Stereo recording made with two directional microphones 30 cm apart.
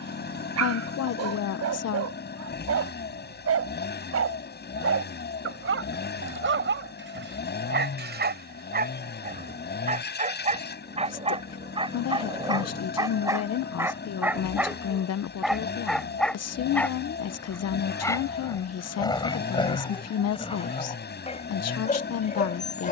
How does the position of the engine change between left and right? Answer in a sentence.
In this clip you hear the engine stay put.